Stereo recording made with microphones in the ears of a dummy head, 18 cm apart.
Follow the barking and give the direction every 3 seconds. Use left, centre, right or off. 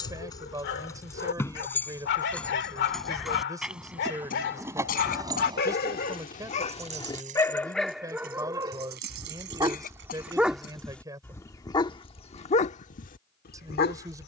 left, left, centre, centre, left.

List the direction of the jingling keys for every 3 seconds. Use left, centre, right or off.
centre, centre, right, right, off.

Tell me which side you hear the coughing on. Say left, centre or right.
left.